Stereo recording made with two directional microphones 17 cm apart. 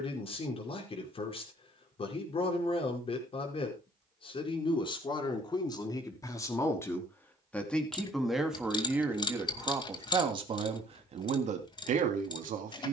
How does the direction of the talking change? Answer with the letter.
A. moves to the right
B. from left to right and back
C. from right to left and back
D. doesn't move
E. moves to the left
A.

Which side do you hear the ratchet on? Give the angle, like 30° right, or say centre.
30° left.